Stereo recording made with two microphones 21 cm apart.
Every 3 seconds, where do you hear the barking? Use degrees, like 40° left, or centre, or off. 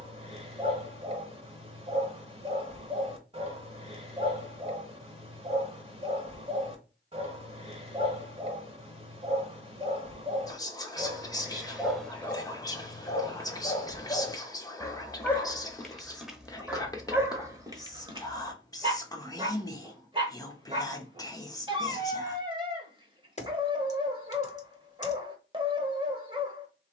30° right, 30° right, 30° right, 20° right, 20° left, centre, 20° right, 20° right, 20° right.